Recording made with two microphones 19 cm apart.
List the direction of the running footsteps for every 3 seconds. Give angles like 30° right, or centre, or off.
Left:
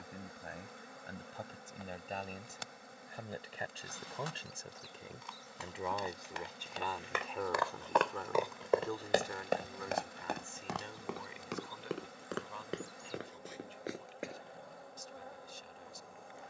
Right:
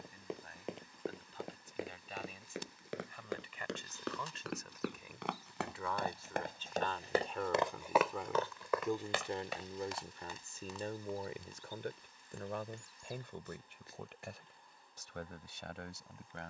80° right, 70° right, 20° right, 60° left, 80° left, off.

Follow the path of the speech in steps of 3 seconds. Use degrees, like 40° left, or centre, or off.
50° left, 30° left, centre, 30° right, 60° right, 70° right.